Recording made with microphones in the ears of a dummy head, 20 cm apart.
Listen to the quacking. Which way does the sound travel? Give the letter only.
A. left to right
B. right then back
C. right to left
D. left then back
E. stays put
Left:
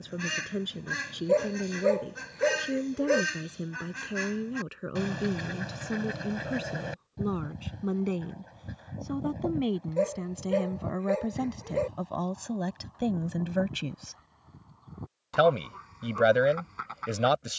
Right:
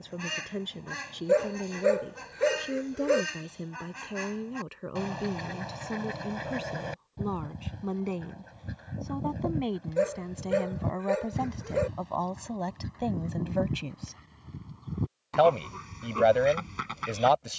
A.